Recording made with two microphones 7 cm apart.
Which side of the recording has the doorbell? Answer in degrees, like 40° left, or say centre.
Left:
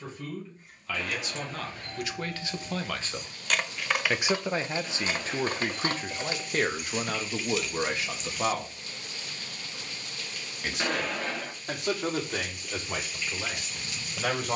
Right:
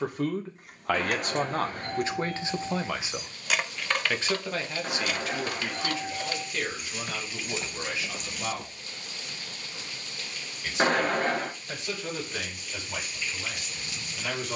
40° right.